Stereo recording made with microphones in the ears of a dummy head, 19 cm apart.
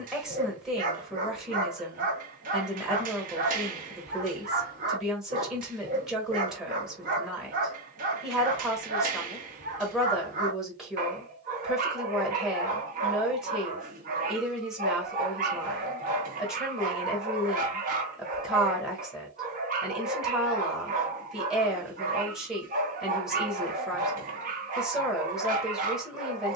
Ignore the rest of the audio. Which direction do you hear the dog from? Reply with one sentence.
You can hear the dog on the right.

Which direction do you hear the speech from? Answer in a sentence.
You can hear the speech in the centre.